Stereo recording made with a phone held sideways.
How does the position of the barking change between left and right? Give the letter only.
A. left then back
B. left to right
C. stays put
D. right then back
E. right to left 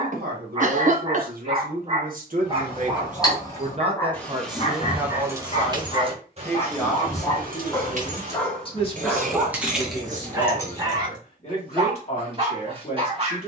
A.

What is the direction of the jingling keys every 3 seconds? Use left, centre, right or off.
left, centre, right, centre, off.